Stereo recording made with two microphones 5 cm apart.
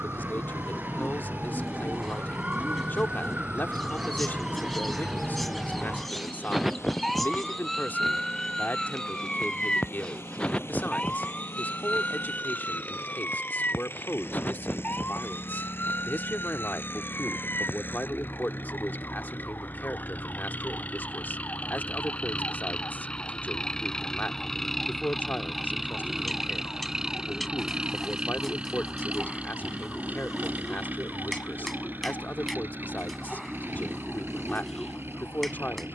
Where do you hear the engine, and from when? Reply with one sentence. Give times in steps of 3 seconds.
You can hear the engine on the left from 0 s, in the centre from 24 s and on the right from 27 s.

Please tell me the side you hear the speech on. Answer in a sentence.
You can hear the speech on the left.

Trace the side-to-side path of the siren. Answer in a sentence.
In this clip you hear the siren move from right to left.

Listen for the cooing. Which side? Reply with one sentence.
In this clip you hear the cooing in the centre.